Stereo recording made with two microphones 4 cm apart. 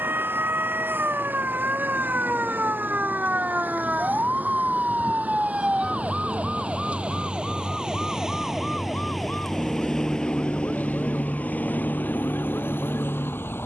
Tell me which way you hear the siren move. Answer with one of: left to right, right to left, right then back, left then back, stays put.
right to left.